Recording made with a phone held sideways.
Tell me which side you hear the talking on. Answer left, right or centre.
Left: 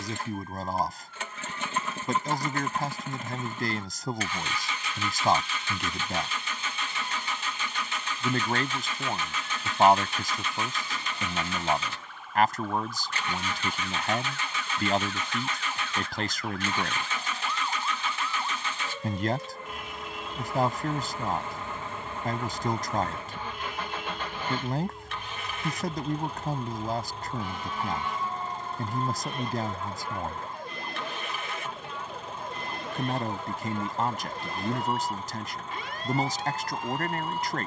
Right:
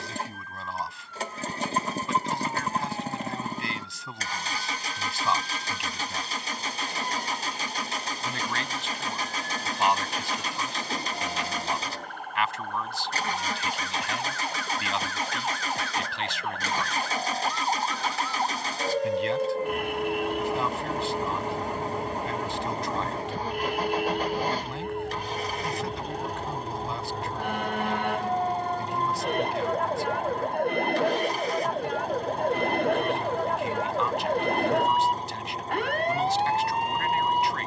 left.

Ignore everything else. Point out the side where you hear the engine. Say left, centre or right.
right.